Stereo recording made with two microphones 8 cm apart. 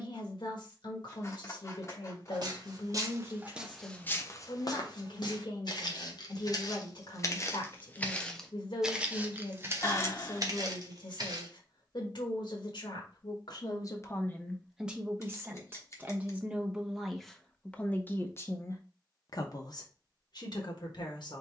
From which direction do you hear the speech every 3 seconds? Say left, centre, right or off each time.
left, left, left, left, left, centre, left.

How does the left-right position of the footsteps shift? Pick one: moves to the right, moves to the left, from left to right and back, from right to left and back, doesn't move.
from right to left and back.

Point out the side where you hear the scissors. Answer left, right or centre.
left.